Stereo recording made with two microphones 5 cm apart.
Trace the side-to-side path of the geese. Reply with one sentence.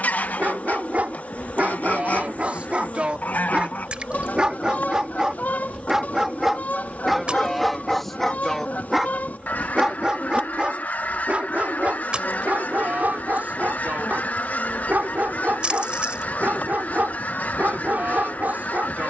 In this clip you hear the geese stay put.